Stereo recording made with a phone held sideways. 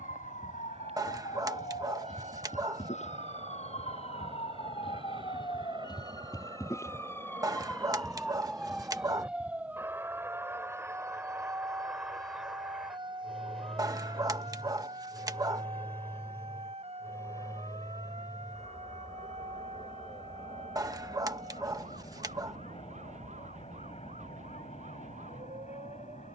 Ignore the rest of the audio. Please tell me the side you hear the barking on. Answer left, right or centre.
right.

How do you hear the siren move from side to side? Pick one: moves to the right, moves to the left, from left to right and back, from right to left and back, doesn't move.
moves to the right.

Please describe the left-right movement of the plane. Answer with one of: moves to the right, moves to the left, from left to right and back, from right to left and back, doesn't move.
moves to the left.